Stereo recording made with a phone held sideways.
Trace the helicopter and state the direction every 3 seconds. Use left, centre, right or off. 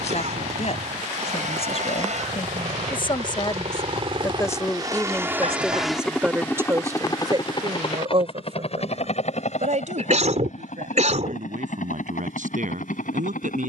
right, right, left, left, left.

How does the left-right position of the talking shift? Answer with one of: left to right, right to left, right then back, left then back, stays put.
left to right.